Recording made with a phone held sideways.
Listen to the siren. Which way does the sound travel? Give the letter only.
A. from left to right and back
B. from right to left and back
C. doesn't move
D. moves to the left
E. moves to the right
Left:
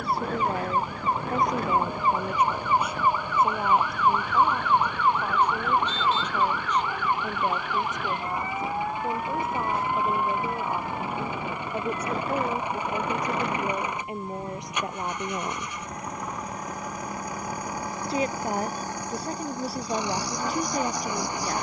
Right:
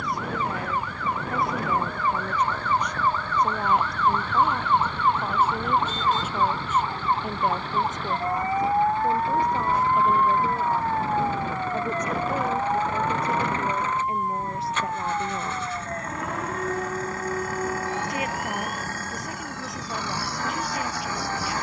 E.